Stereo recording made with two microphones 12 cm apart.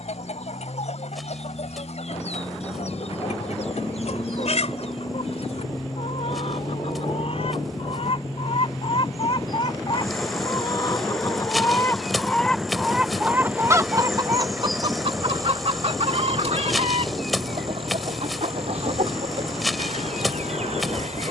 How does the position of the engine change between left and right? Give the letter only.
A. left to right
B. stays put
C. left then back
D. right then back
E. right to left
A.